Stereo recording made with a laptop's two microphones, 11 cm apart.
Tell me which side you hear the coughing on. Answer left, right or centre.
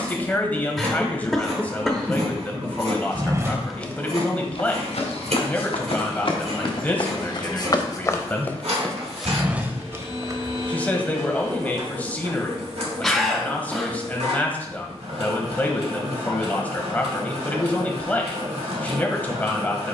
centre.